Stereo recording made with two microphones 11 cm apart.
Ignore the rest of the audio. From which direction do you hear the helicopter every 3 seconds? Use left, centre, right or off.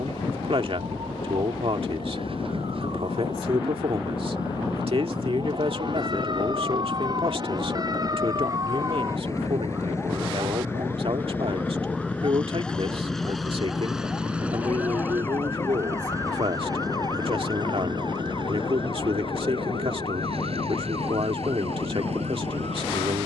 left, left, left, left, centre, right, right, right.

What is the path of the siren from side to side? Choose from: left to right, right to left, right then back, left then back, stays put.
right to left.